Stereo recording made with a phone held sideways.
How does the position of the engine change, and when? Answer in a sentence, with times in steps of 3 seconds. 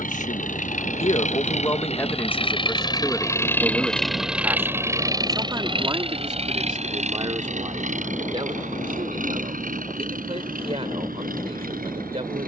In this clip you hear the engine on the left from 0 s, in the centre from 3 s and on the right from 6 s.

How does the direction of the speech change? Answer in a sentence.
You can hear the speech move to the right.